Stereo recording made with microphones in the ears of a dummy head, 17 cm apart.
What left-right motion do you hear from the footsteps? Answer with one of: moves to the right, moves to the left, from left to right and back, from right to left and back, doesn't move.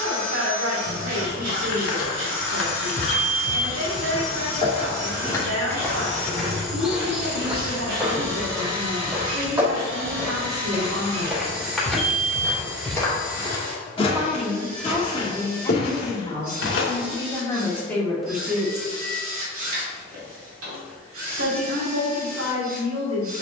from left to right and back.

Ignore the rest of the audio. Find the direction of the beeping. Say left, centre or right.
centre.